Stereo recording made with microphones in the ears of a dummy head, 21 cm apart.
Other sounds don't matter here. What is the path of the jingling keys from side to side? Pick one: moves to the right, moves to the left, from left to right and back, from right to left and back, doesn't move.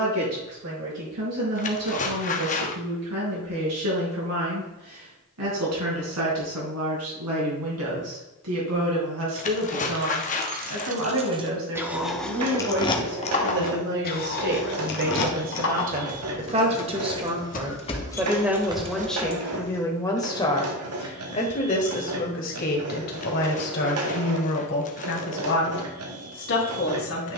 from right to left and back.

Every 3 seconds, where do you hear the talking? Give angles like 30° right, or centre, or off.
80° right, 80° right, 70° right, 60° right, 50° right, 30° right, 10° left, 40° left, 50° left.